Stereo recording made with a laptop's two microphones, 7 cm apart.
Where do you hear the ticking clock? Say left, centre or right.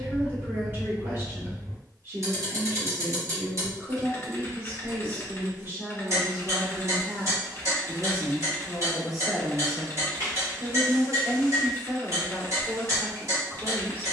right.